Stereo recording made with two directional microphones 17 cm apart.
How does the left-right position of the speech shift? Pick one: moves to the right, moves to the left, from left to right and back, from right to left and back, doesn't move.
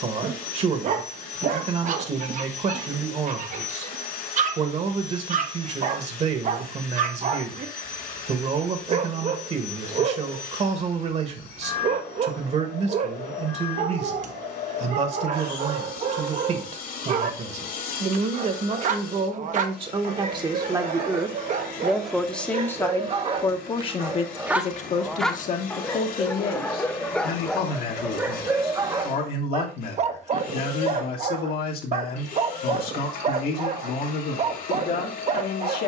moves to the left.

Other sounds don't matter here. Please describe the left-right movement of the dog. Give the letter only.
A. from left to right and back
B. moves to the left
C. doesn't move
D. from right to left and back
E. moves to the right
D.